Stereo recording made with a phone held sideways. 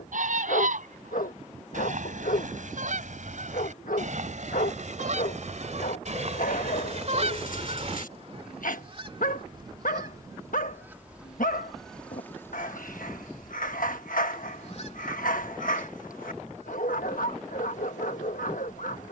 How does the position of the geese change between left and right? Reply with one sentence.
In this clip you hear the geese move from right to left.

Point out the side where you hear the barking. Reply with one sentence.
In this clip you hear the barking on the left.